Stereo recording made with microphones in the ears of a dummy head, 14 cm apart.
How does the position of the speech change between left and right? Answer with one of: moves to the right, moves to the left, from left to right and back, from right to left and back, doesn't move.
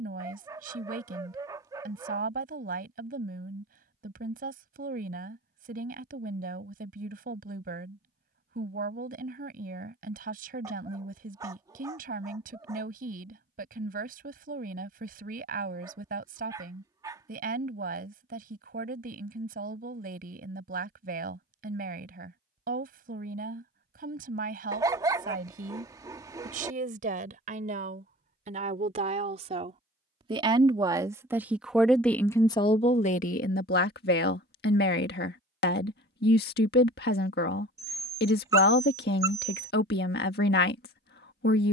moves to the left.